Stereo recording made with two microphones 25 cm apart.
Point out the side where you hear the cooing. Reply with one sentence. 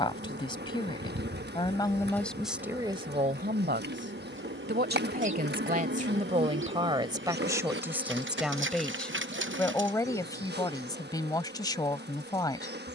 You can hear the cooing on the right.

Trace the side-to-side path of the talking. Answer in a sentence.
In this clip you hear the talking go right and come back.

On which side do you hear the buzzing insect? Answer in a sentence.
You can hear the buzzing insect on the right.